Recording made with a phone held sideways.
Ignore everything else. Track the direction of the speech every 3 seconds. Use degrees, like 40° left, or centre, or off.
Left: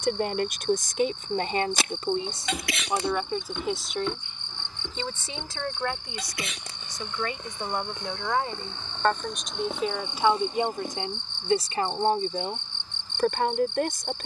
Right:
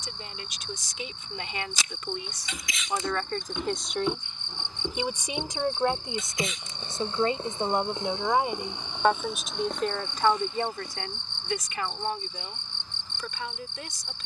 50° left, centre, 20° right, 10° left, 50° left.